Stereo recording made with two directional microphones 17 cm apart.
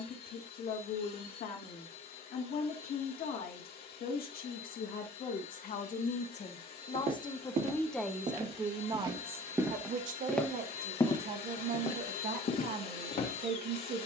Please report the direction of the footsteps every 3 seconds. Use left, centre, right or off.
off, off, right, centre, left.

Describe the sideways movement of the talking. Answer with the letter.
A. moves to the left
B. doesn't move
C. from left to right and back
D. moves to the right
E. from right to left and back
D.